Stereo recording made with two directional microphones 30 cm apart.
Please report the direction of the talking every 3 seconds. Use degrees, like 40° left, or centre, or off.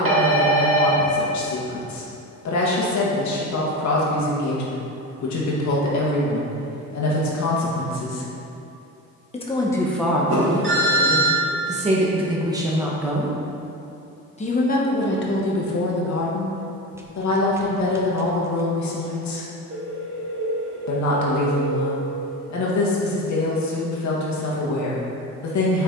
60° left, 60° left, 60° left, 10° right, centre, 50° left, 60° left, 60° left, 60° left.